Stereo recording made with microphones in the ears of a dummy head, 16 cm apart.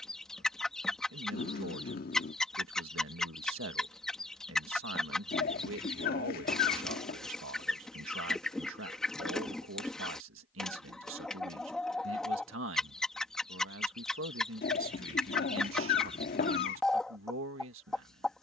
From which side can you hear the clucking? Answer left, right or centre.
centre.